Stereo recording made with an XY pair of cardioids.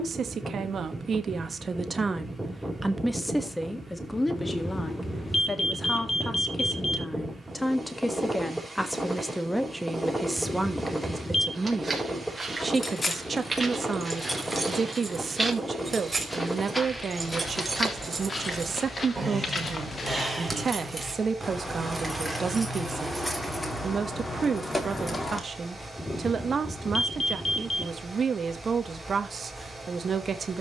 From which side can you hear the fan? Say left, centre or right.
centre.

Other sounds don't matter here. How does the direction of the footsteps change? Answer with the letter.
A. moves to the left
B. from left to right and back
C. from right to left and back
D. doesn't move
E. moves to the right
A.